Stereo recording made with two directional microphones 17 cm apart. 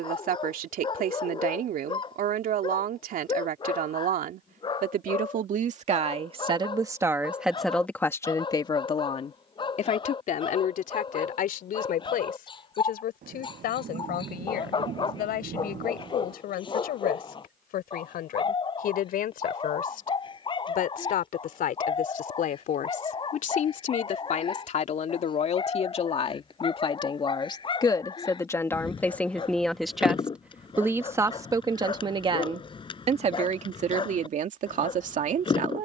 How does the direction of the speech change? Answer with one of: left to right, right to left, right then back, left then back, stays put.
left then back.